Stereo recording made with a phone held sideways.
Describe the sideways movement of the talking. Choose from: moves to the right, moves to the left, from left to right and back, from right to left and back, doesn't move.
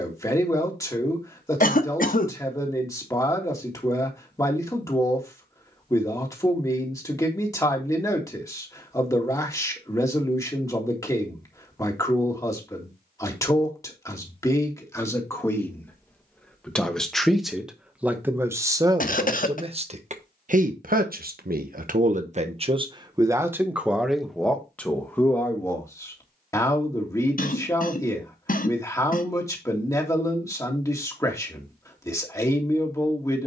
from left to right and back.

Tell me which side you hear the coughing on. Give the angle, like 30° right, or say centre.
60° left.